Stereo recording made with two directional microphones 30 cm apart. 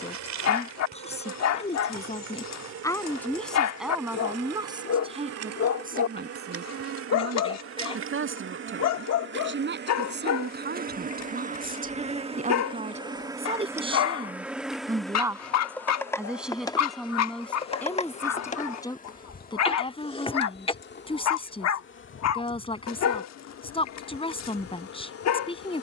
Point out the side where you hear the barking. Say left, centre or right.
left.